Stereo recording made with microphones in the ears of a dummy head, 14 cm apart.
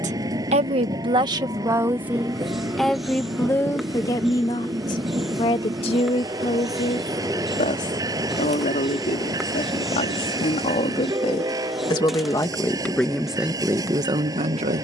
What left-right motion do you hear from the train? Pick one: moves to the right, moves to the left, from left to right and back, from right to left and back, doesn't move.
doesn't move.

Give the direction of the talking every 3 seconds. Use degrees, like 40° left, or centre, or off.
20° right, 20° left, 40° left, 40° left, 10° right.